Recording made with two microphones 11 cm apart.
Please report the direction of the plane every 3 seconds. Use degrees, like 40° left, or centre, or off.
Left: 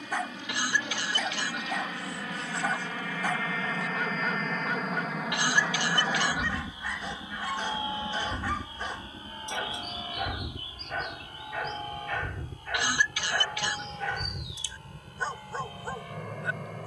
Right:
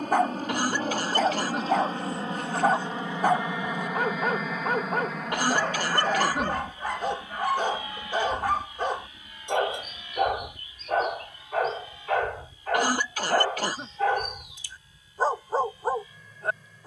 40° right, 10° right, 20° left, 40° left, 50° left, 60° left.